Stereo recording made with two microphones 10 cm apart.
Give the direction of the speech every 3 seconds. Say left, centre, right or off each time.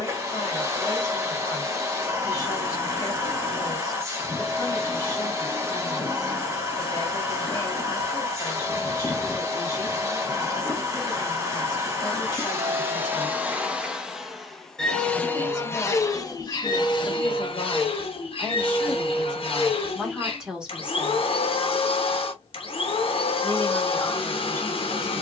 left, left, left, left, left, left, centre, centre, left.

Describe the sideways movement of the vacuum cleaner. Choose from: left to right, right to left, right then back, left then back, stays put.
right to left.